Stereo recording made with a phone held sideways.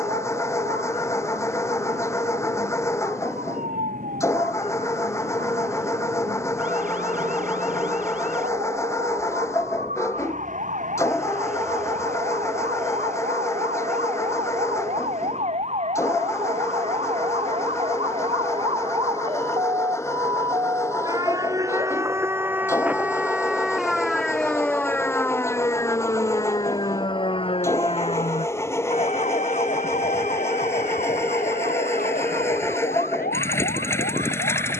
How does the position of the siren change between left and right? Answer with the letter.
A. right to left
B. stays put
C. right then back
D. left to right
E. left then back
A.